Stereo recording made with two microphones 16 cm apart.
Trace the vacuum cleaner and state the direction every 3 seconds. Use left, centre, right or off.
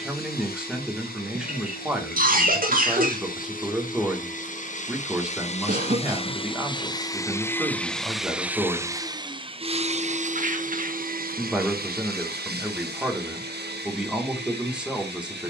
left, left, centre, right, right.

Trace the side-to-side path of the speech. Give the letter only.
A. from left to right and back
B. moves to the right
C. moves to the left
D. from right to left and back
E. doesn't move
E.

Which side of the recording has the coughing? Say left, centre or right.
right.